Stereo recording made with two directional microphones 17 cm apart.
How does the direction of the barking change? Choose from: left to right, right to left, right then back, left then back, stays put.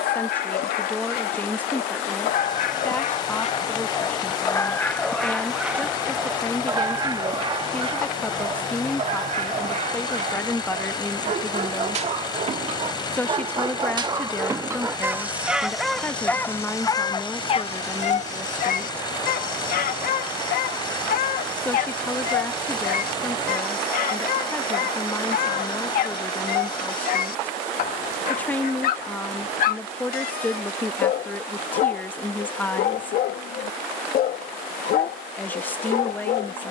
right then back.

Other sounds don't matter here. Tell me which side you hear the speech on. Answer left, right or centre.
centre.